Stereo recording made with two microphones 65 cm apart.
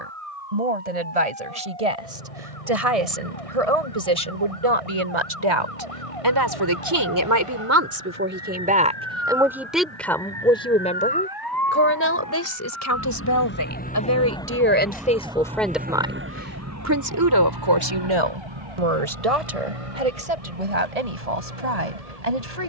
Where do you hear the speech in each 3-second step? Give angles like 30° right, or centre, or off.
70° right, 50° right, 20° right, 10° left, 20° left, 20° right, 60° right, 80° right.